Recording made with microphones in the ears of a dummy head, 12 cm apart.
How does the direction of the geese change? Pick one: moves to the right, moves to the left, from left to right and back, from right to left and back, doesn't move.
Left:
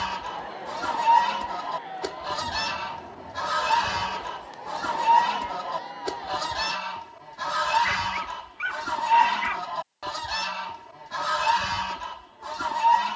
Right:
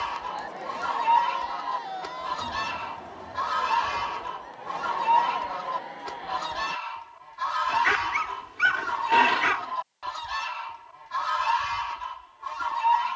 doesn't move.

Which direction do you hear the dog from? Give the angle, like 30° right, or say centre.
80° right.